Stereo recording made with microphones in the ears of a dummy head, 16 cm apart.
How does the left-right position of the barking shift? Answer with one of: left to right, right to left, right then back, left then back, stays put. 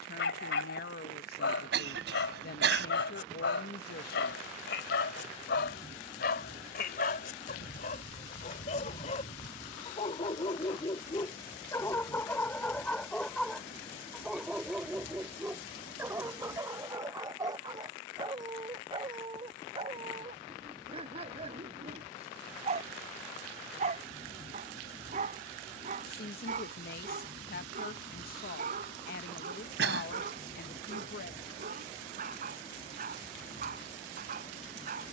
left to right.